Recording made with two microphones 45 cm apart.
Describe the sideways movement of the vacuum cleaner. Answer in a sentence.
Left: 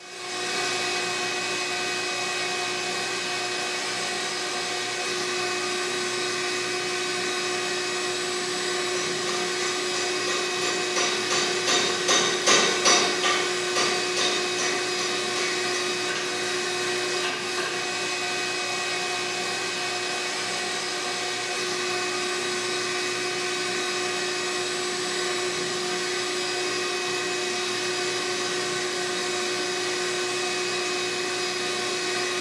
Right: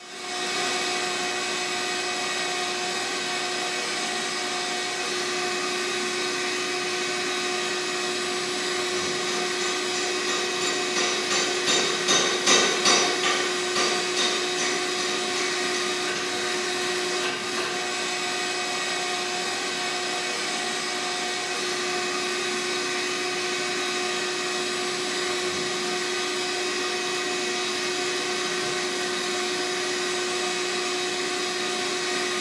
In this clip you hear the vacuum cleaner stay put.